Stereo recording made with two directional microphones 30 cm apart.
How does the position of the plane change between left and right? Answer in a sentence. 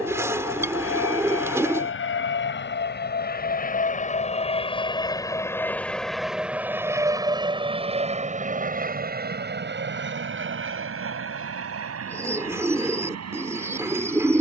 You can hear the plane move to the right.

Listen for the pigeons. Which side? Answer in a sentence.
In this clip you hear the pigeons in the centre.